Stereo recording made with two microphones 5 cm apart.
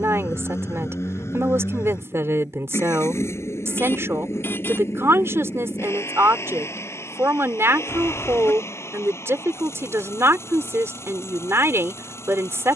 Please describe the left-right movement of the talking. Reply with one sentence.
You can hear the talking stay put.